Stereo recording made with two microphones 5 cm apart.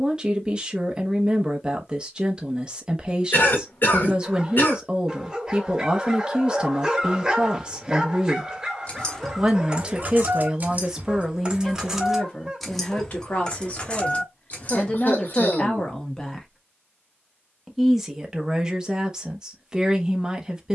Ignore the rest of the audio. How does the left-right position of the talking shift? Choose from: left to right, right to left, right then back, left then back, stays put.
left then back.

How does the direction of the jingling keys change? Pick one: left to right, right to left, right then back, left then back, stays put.
right then back.